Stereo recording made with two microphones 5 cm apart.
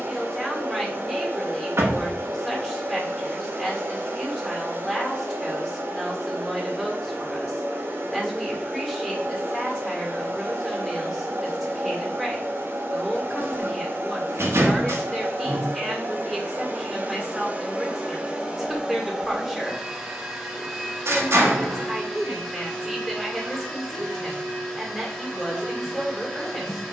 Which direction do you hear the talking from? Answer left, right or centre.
centre.